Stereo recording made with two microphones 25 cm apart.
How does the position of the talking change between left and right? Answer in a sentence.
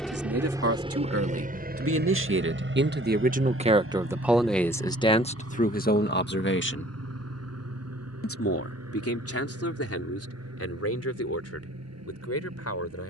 In this clip you hear the talking go from the right side to the left.